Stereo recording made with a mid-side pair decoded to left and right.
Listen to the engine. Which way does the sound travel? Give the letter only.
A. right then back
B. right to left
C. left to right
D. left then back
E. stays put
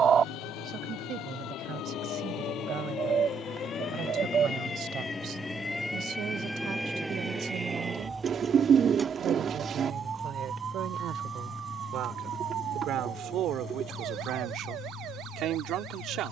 B.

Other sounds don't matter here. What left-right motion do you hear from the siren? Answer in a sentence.
You can hear the siren travel towards the right.